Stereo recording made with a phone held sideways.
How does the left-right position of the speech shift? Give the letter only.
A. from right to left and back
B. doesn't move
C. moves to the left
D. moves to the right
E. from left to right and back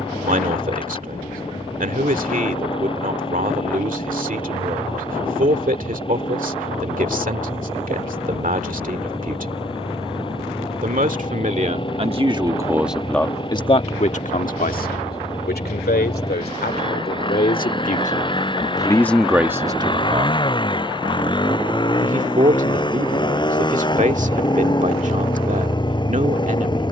A.